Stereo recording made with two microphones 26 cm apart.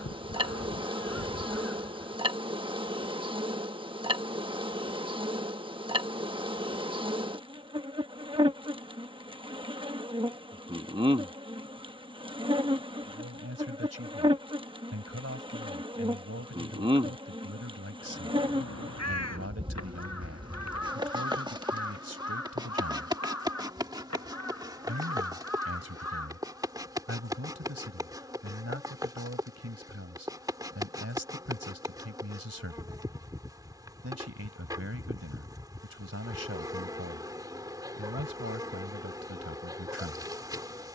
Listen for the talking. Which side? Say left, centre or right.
right.